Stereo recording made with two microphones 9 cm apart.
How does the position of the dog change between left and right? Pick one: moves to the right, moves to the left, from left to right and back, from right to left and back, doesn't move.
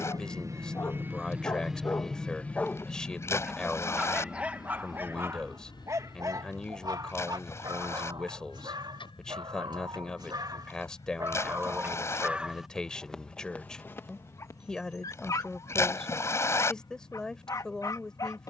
from left to right and back.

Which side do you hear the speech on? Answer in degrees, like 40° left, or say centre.
10° left.